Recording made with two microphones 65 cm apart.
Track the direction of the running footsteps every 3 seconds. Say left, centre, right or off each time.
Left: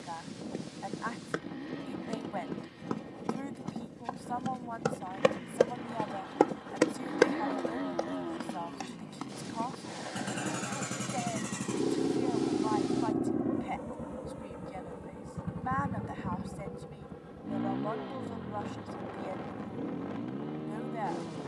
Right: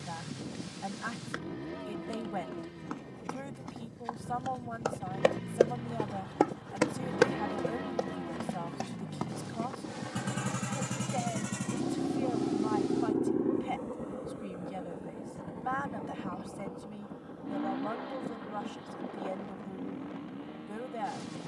left, left, right, right, off, off, off.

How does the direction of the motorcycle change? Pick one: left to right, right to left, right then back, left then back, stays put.
right to left.